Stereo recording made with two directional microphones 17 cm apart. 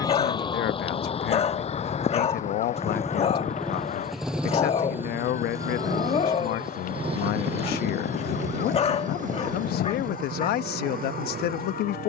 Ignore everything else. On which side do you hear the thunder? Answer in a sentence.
You can hear the thunder on the left.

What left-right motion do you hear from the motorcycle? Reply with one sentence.
In this clip you hear the motorcycle move from left to right.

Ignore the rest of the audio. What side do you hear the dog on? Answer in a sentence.
In this clip you hear the dog on the left.